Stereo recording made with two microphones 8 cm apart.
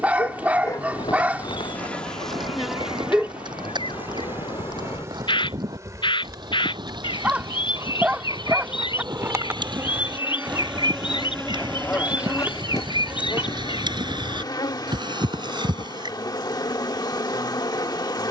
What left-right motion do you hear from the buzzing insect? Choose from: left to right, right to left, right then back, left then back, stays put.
right then back.